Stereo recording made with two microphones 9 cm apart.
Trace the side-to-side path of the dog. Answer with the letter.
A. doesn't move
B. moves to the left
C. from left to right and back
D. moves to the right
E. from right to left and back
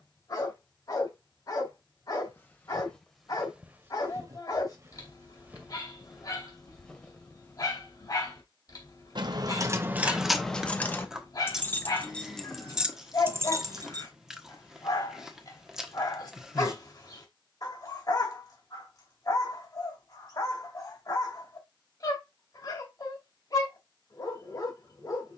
A.